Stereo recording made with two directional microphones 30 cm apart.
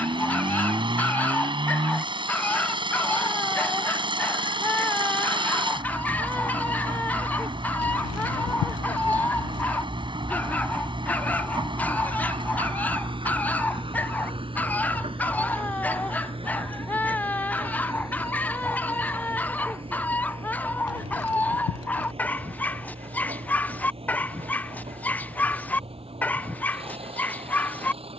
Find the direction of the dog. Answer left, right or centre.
centre.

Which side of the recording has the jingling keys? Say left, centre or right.
left.